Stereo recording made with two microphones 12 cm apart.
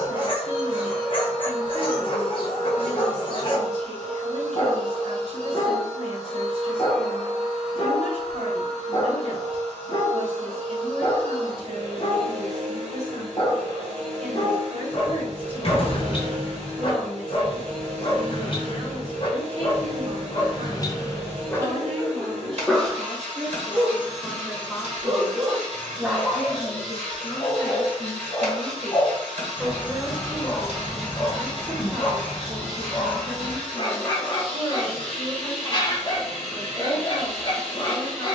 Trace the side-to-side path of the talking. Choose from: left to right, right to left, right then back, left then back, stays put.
left then back.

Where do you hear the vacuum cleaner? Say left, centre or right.
right.